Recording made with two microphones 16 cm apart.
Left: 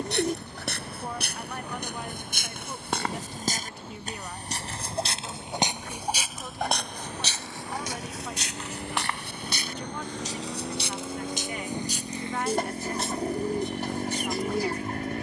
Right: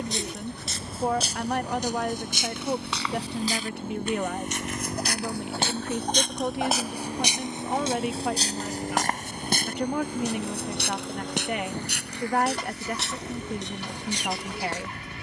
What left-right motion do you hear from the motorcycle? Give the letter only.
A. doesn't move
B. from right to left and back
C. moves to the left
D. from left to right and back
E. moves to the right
C.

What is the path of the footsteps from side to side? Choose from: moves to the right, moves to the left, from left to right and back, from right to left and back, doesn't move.
moves to the right.